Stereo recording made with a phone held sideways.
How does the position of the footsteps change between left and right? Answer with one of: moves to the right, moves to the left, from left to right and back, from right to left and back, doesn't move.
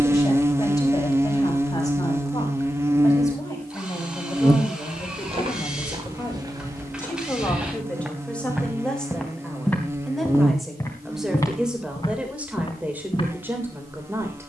moves to the left.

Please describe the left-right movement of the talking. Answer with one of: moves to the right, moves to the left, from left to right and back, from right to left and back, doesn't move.
moves to the right.